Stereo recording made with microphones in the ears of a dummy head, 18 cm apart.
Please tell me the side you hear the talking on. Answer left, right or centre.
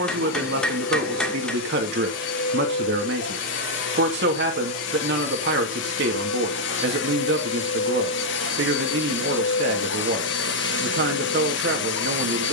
right.